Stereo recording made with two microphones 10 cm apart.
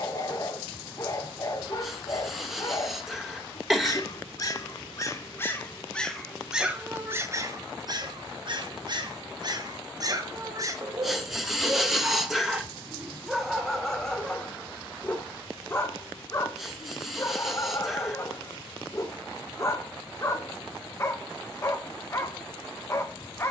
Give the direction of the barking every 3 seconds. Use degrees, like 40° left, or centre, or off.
30° left, 30° left, 30° right, 30° right, centre, 30° left, 30° left, 30° left.